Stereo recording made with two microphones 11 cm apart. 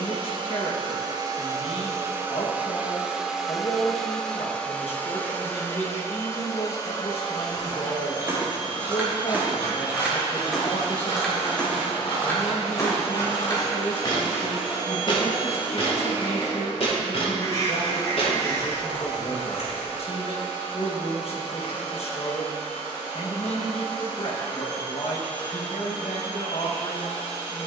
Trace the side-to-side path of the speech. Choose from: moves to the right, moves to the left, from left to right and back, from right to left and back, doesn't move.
doesn't move.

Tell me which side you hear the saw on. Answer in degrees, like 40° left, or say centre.
30° left.